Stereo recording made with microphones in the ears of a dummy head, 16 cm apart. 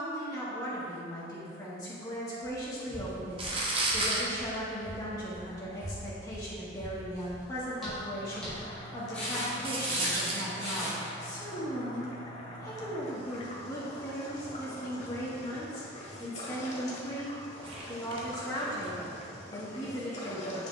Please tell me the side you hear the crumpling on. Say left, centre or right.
right.